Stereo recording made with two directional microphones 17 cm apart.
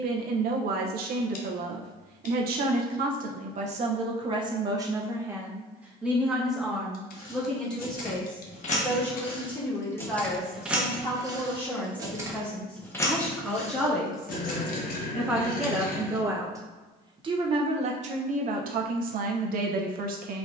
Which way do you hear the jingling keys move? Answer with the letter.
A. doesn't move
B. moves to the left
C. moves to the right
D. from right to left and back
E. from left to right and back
E.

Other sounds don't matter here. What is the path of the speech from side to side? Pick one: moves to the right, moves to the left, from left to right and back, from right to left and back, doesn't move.
from right to left and back.